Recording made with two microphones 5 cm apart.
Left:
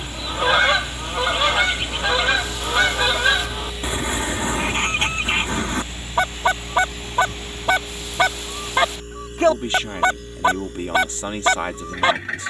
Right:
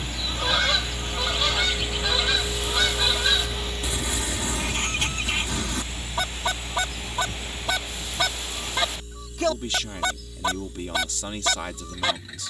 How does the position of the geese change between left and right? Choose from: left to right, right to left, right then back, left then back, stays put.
stays put.